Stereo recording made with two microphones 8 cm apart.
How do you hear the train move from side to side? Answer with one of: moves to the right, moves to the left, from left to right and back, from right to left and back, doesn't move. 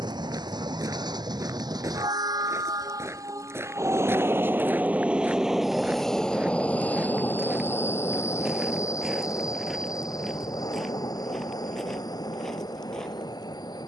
moves to the left.